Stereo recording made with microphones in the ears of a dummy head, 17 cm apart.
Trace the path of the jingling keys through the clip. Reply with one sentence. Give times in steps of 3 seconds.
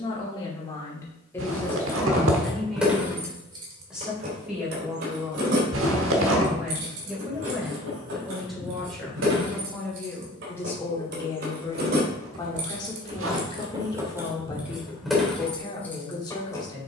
You can hear the jingling keys in the centre from 0 s, on the right from 3 s and in the centre from 15 s.